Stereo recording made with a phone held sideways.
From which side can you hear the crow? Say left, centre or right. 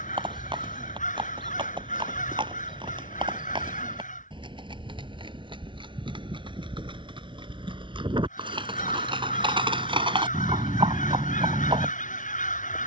left.